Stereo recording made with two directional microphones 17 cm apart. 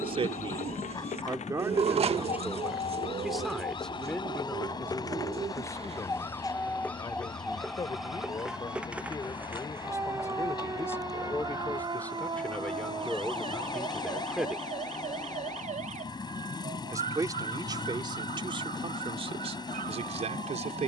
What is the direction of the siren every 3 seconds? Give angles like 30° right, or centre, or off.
40° left, 30° left, centre, 20° right, 30° right, 40° right, 50° right.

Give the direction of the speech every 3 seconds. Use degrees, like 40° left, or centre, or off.
20° right, 10° left, 20° left, 20° left, centre, 20° right, 30° right.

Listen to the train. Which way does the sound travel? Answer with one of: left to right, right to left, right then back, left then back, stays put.
stays put.